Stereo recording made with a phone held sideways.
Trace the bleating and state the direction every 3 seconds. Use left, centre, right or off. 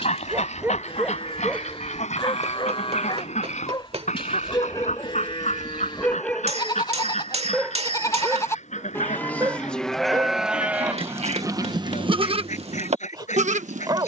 left, left, left, centre, right.